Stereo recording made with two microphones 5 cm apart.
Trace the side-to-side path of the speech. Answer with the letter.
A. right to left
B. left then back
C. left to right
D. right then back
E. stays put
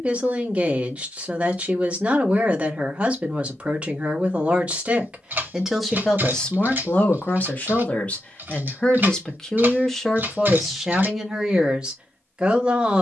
B.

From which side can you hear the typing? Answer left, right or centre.
right.